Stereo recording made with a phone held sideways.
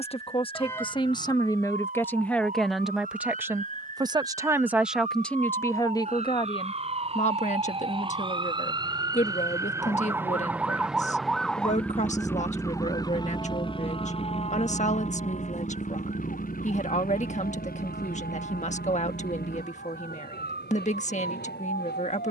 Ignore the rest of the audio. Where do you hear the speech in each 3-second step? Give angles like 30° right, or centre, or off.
20° left, centre, 40° left, 50° left, 50° left, 50° left, 50° left, 50° left.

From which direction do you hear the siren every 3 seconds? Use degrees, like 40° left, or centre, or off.
60° right, 50° right, 40° right, 10° right, 30° left, 50° left, 70° left, 70° left.